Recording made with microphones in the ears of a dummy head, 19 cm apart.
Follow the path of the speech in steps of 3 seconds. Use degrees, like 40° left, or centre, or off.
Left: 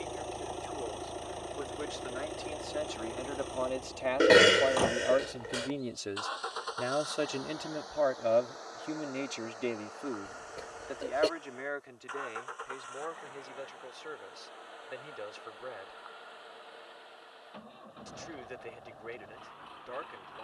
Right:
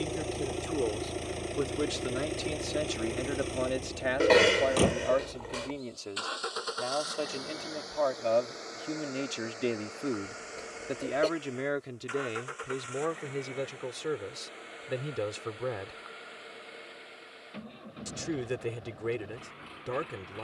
50° right, 10° right, 10° left, 30° right, 60° right, 60° right, 60° right.